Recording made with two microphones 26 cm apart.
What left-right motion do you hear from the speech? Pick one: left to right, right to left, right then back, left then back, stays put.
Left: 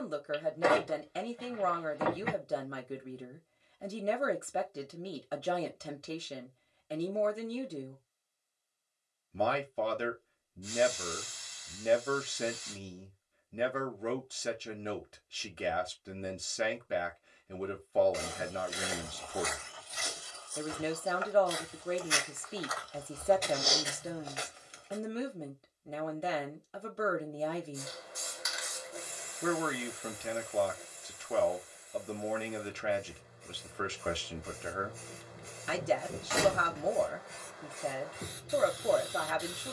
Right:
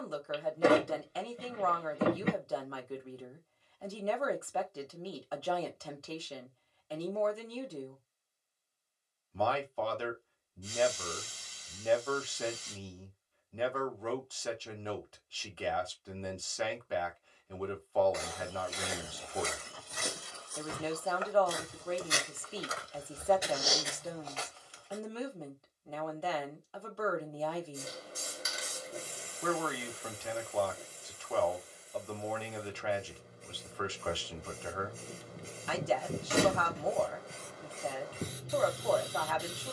stays put.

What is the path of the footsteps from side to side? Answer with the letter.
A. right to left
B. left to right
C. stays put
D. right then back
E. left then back
D.